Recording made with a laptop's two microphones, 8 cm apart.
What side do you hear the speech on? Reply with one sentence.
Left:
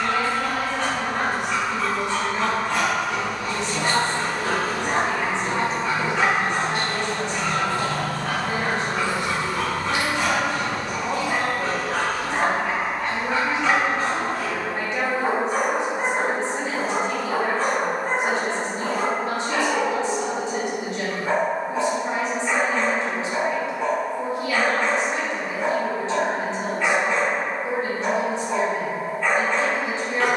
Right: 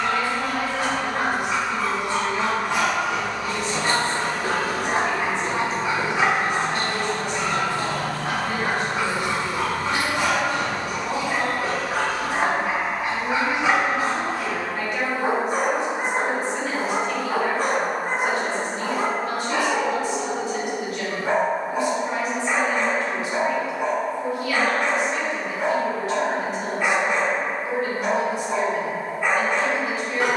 In this clip you hear the speech on the left.